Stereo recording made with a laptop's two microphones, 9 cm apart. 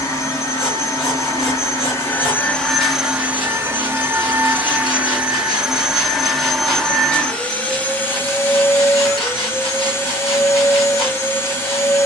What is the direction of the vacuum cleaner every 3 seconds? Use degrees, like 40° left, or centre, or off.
30° left, 10° right, 10° left, 30° left.